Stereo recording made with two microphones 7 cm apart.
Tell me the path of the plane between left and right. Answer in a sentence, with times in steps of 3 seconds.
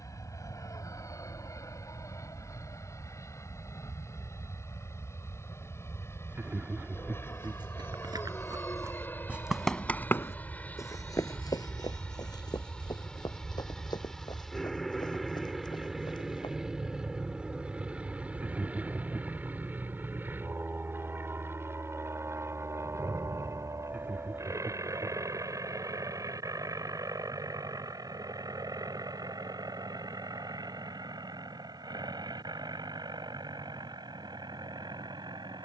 In this clip you hear the plane on the left from 0 s, in the centre from 12 s and on the right from 18 s.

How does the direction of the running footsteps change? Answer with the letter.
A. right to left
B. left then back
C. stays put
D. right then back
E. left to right
A.